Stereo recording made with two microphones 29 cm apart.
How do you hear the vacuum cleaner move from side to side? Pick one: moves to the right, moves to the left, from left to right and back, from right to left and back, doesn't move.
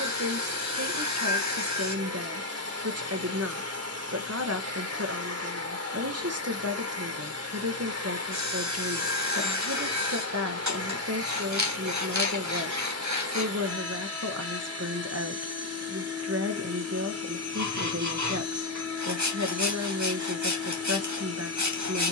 doesn't move.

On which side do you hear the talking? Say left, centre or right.
right.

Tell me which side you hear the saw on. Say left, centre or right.
right.